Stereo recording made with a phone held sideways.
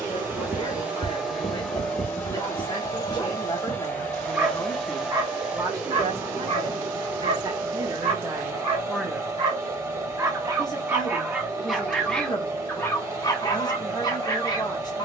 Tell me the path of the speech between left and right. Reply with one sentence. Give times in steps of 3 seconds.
In this clip you hear the speech on the left from 0 s, in the centre from 3 s, on the right from 6 s and on the left from 9 s.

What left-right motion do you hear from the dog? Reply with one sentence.
In this clip you hear the dog move from left to right and back again.